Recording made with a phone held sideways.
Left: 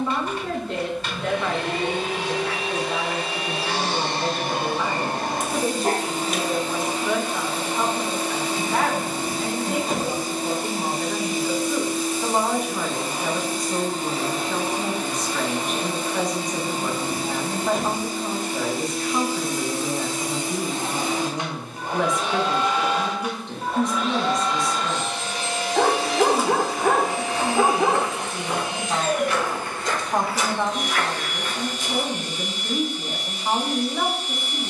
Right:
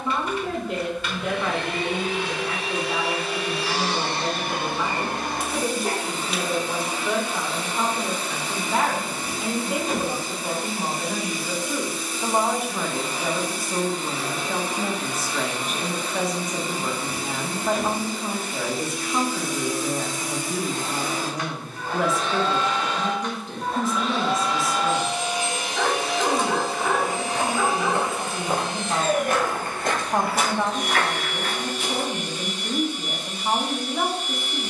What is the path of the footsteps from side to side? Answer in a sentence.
You can hear the footsteps go from the left side to the right.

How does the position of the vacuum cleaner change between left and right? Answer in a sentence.
You can hear the vacuum cleaner move to the right.